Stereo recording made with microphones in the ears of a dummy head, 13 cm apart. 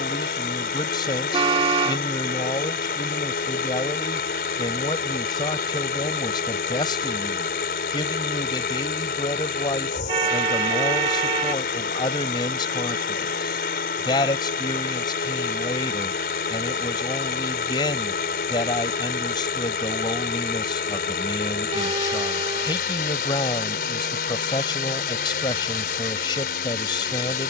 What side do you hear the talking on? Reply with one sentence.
You can hear the talking on the left.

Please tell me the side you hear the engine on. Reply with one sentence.
You can hear the engine on the left.